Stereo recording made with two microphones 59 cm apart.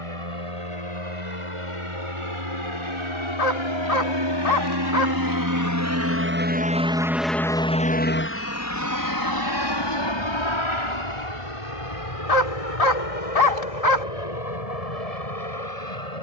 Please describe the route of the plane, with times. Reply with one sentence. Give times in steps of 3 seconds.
In this clip you hear the plane on the right from 0 s, in the centre from 6 s and on the left from 9 s.